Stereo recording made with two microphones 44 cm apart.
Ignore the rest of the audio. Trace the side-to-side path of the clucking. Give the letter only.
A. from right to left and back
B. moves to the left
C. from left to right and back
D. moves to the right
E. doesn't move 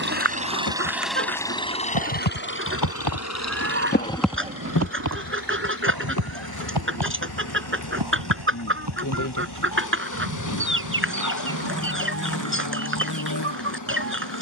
E.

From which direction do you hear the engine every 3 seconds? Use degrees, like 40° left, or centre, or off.
10° left, 50° left, 60° left, 70° left, 70° left.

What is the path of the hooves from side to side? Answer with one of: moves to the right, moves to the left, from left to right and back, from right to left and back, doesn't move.
moves to the right.